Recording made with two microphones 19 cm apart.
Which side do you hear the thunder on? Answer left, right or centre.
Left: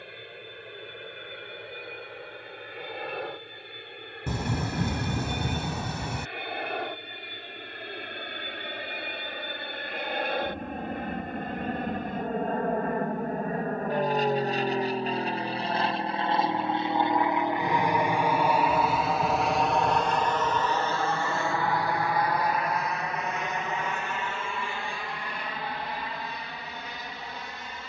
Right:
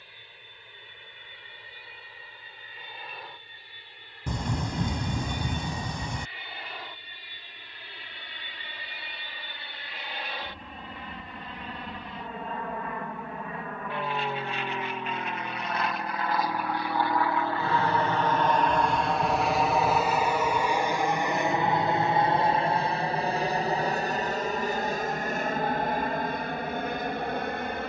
centre.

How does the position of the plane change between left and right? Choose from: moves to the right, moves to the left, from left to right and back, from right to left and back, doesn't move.
moves to the right.